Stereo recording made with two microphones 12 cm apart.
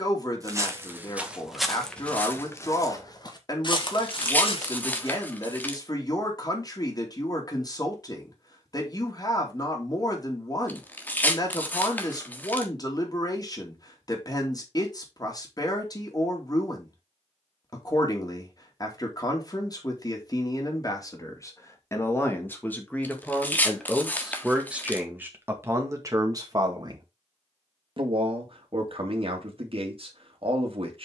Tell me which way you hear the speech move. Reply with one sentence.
In this clip you hear the speech go from the left side to the right.